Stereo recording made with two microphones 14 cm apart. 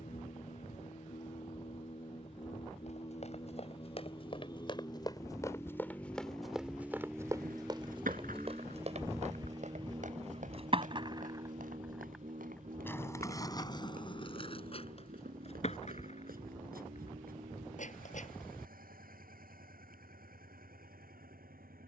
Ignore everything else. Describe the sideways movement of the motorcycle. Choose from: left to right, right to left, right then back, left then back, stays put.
left to right.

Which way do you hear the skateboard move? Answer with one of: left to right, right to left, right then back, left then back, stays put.
right to left.